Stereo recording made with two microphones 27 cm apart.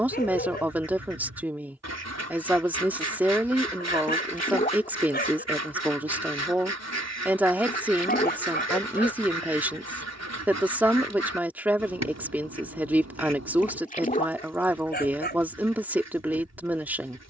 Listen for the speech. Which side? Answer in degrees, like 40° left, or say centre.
10° right.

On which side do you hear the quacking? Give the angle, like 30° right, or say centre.
70° right.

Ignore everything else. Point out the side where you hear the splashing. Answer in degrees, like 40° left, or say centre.
30° left.